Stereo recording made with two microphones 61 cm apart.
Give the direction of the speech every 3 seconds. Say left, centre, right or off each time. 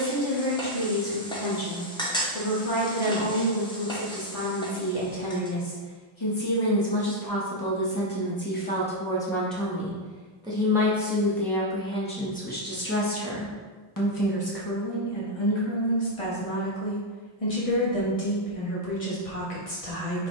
left, left, left, centre, left, left, left.